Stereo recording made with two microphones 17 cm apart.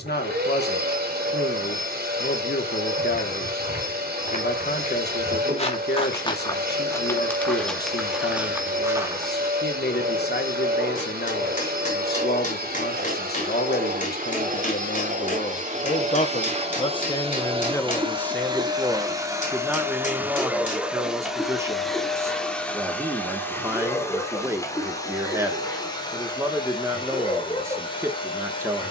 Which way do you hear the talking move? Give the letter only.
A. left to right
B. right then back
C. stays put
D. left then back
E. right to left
A.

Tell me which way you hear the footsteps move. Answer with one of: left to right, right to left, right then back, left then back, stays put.
left to right.